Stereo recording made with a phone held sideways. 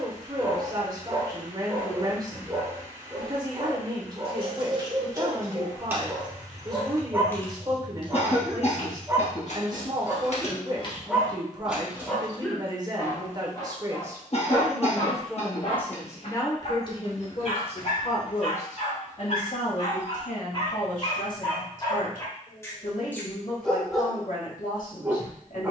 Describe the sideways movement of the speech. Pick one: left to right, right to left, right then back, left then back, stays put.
right to left.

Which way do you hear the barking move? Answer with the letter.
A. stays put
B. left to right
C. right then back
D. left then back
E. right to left
D.